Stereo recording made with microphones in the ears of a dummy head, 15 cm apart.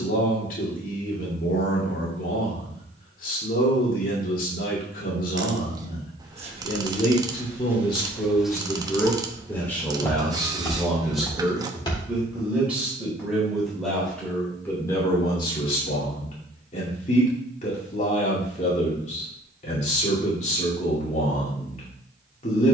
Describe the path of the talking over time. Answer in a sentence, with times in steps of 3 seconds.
In this clip you hear the talking on the left from 0 s, in the centre from 9 s and on the left from 15 s.